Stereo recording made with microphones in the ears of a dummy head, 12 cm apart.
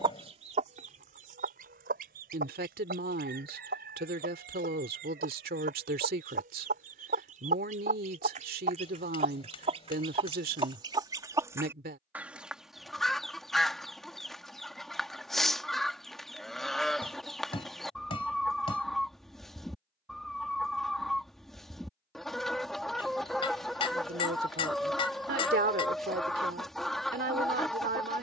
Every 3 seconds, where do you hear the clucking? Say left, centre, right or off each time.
right, right, right, right, centre, centre, centre, centre, centre, centre.